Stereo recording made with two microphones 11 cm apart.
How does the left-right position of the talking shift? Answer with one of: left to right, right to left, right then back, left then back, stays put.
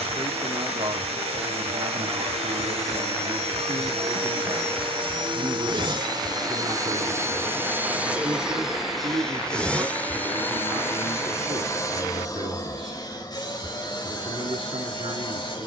stays put.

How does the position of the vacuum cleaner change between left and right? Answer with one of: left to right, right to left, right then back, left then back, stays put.
right to left.